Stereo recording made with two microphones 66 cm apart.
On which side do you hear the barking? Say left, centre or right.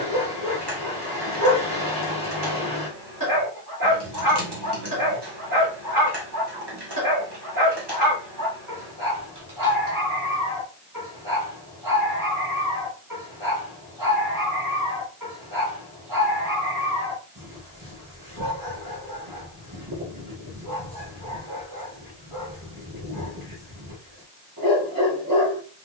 right.